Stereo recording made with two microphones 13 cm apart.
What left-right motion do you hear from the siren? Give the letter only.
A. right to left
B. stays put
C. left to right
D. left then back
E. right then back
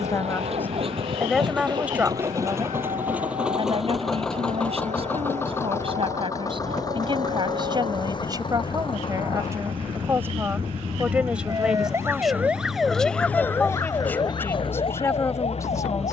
A.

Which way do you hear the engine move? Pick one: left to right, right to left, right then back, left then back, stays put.
right to left.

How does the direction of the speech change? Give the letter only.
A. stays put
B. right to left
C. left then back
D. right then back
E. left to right
D.